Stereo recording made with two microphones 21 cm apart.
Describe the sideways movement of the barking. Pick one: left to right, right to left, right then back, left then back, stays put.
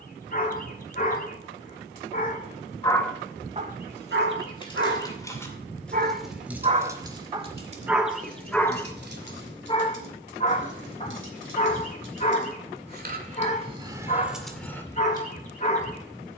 right then back.